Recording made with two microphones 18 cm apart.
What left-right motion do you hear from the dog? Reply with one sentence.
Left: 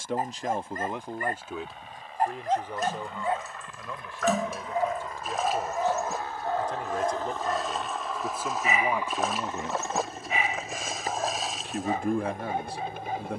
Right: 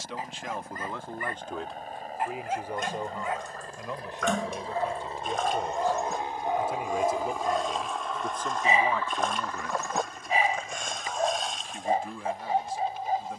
In this clip you hear the dog move from left to right.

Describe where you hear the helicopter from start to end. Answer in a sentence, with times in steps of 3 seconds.
You can hear the helicopter on the right from 0 s, in the centre from 6 s and on the left from 9 s.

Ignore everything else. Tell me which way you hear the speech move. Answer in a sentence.
In this clip you hear the speech go right and come back.